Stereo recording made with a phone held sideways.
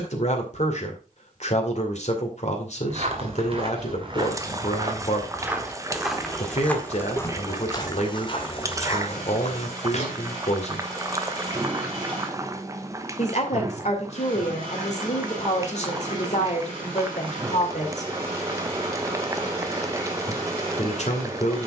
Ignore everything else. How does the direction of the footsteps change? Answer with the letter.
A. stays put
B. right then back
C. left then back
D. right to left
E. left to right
D.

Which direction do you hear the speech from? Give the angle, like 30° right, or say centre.
50° left.